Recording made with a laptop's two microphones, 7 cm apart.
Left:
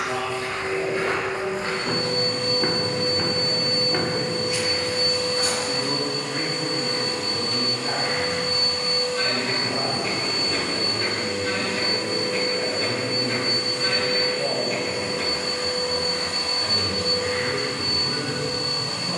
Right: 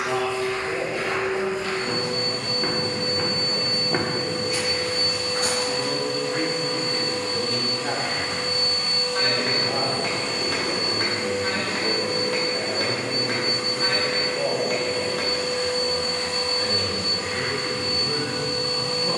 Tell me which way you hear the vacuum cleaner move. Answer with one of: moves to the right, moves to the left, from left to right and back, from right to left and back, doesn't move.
from left to right and back.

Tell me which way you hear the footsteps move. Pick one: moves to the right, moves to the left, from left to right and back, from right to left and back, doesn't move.
moves to the right.